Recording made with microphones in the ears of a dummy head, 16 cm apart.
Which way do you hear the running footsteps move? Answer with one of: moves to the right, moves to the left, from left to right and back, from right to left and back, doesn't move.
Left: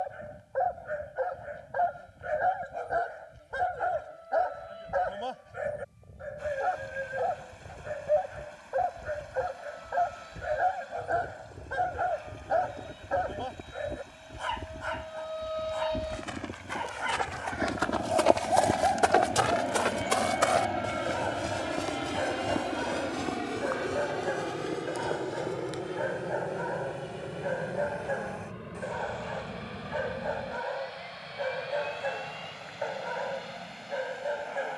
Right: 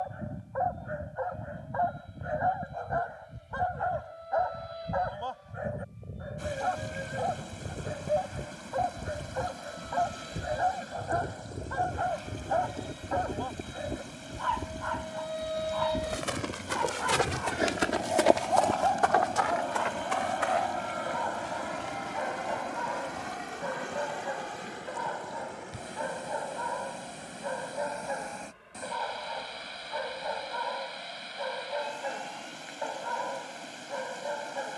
moves to the left.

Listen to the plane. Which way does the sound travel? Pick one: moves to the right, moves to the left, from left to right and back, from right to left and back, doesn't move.
moves to the left.